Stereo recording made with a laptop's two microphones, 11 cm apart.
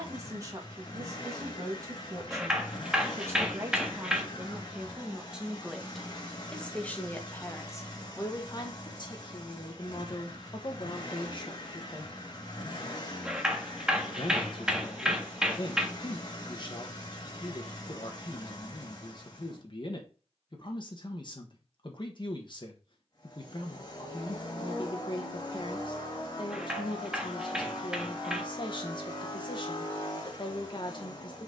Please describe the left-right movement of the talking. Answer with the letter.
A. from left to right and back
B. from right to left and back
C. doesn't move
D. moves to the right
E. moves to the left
E.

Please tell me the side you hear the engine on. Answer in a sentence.
In this clip you hear the engine on the left.